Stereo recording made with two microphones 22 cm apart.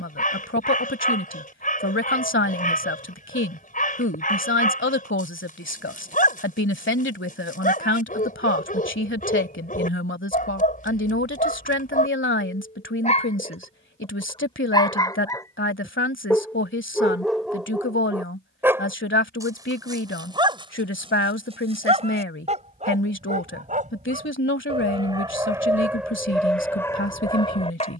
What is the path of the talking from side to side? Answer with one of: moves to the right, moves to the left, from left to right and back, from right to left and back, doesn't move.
doesn't move.